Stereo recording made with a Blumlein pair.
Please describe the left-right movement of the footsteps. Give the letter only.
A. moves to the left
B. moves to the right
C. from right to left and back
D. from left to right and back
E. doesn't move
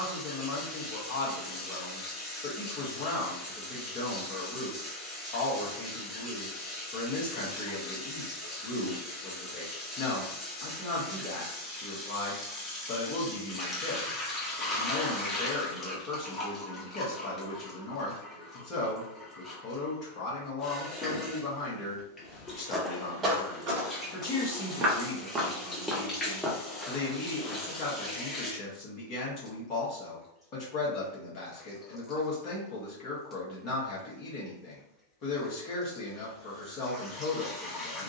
D.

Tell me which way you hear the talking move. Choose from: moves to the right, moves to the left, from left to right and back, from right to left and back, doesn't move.
doesn't move.